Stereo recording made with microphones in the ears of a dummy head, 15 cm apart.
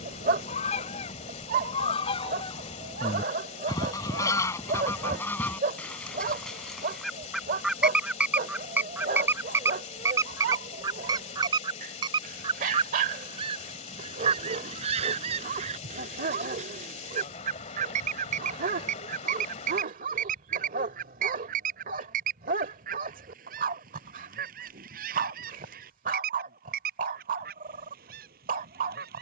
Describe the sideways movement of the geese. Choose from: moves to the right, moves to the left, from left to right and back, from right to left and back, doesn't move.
moves to the right.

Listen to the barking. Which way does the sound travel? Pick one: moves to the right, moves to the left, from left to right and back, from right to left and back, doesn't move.
doesn't move.